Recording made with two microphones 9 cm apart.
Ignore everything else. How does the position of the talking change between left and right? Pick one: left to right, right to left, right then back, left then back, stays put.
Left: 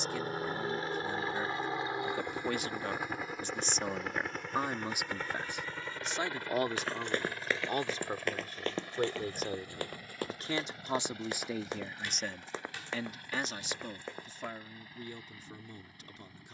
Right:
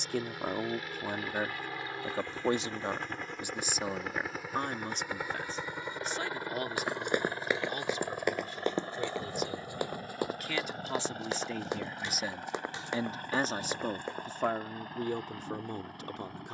left then back.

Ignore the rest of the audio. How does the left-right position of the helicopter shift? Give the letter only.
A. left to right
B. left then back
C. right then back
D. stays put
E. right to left
A.